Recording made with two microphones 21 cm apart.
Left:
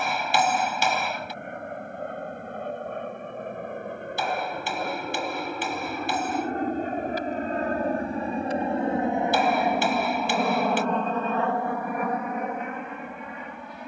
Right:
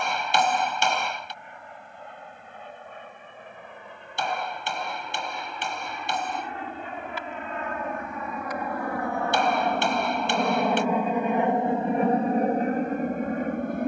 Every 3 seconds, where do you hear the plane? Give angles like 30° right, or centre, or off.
70° left, 60° left, 40° left, centre, 40° right.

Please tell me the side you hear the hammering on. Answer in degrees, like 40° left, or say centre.
centre.